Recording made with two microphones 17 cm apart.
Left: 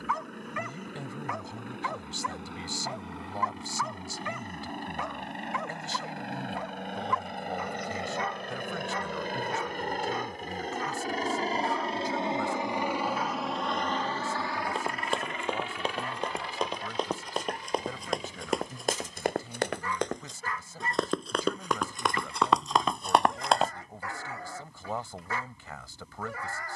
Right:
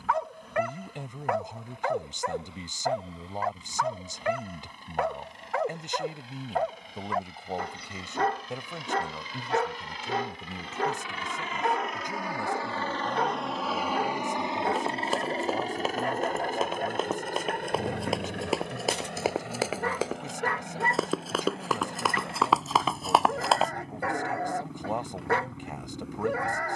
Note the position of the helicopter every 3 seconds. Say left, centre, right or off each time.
left, left, left, left, centre, right, right, right, right.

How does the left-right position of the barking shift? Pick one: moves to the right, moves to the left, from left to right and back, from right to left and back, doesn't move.
doesn't move.